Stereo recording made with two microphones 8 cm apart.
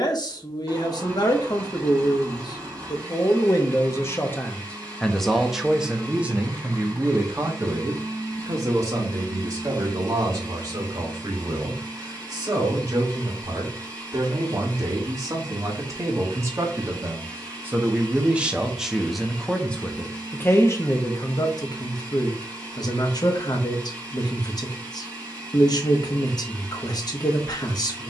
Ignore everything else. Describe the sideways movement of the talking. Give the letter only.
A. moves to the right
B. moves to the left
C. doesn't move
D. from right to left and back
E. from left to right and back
E.